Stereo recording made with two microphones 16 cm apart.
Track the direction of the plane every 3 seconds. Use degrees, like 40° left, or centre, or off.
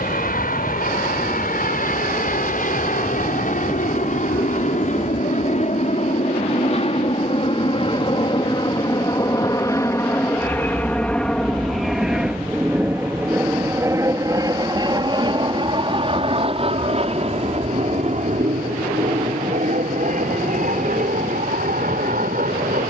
60° left, 50° left, 40° left, 10° left, 10° right, 30° right, 50° right, 50° right.